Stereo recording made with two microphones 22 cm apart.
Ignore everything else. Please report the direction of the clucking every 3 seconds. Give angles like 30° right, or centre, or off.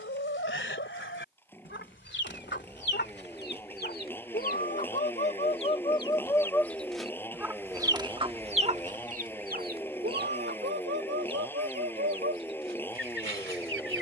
60° left, 40° left, 10° right, 50° right, 70° right.